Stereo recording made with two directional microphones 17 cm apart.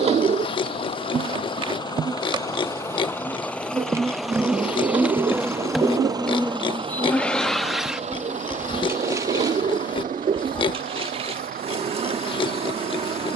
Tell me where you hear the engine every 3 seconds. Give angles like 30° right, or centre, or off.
30° left, centre, 30° right, 50° right, 60° right.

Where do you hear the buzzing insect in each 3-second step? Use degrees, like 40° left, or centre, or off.
30° right, 10° right, centre, 30° right, 30° right.